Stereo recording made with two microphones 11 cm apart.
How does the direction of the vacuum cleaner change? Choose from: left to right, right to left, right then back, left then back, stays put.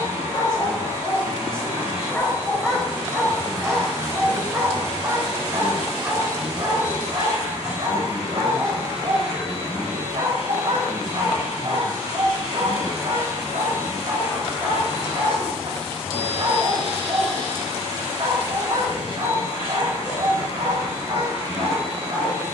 stays put.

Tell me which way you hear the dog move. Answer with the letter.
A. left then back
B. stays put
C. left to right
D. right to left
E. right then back
C.